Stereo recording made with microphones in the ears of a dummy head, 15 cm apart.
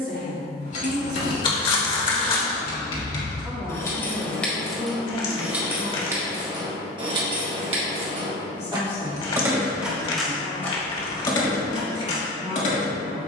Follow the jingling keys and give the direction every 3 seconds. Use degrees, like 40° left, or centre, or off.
40° left, 10° left, 30° right, 10° left, 40° left.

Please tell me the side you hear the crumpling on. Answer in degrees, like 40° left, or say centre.
30° left.